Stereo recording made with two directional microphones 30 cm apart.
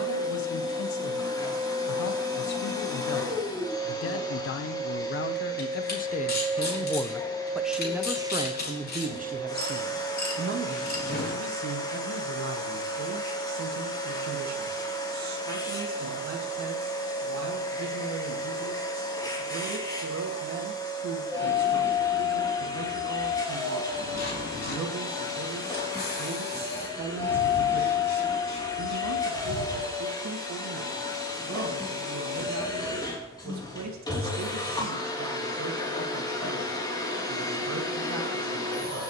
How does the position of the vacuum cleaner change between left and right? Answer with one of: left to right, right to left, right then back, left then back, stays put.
stays put.